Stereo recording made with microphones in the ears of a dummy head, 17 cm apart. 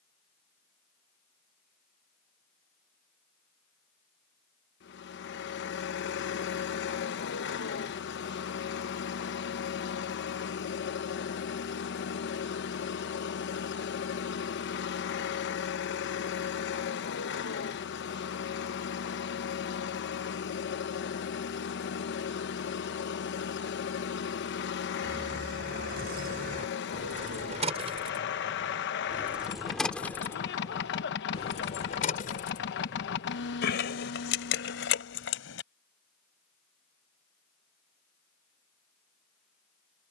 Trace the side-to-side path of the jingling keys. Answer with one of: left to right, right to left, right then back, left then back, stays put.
right to left.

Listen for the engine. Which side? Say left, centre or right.
left.